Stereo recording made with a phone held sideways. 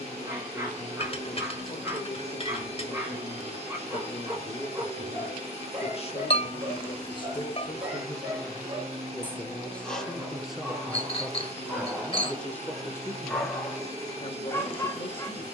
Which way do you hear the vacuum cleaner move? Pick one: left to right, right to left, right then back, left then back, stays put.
stays put.